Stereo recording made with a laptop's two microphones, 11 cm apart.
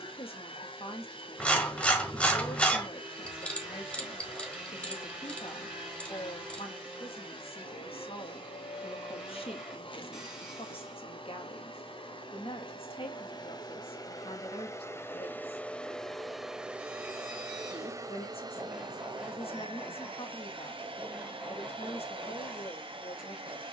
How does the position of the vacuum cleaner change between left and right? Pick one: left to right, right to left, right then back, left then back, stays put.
left to right.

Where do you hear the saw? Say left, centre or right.
centre.